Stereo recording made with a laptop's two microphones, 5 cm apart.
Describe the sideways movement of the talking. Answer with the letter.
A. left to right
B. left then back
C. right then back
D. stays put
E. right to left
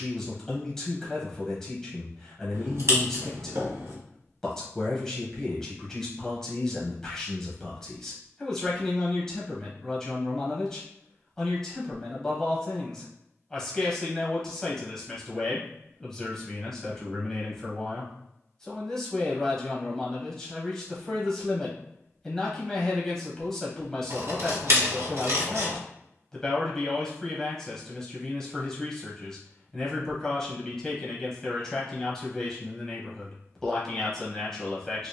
D.